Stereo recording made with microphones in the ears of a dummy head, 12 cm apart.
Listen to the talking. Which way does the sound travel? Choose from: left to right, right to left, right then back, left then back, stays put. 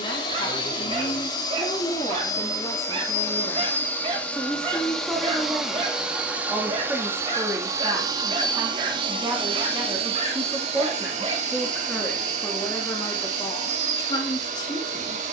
right then back.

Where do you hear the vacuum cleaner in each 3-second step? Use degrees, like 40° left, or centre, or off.
30° left, 10° left, 20° right, 50° right, 60° right.